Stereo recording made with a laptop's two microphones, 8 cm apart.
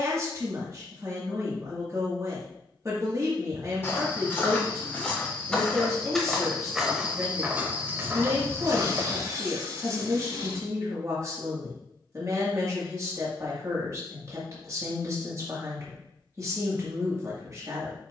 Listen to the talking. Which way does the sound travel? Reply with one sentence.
You can hear the talking stay in one place.